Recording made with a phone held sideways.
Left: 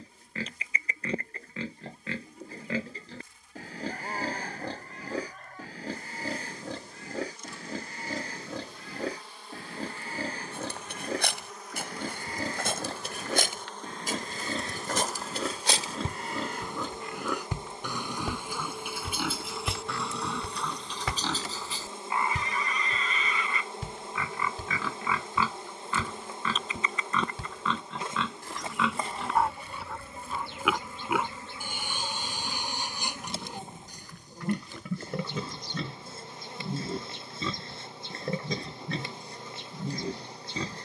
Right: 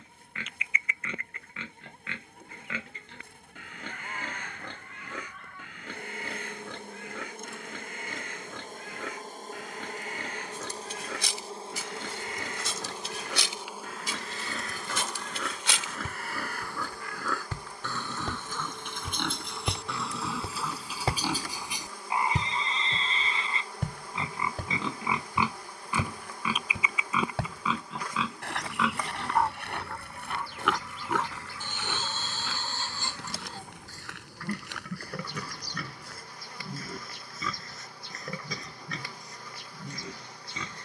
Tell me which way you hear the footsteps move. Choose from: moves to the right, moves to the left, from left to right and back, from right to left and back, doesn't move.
moves to the right.